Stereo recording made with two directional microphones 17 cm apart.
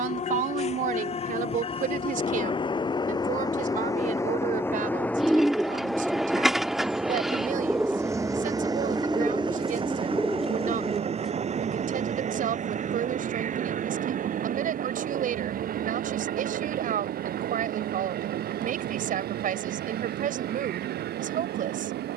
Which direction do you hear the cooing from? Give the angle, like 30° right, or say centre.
centre.